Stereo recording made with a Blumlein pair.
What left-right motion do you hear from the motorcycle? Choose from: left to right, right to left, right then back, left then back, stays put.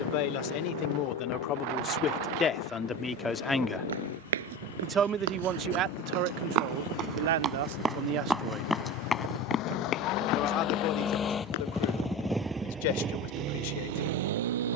left to right.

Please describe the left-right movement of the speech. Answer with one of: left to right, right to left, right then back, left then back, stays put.
right then back.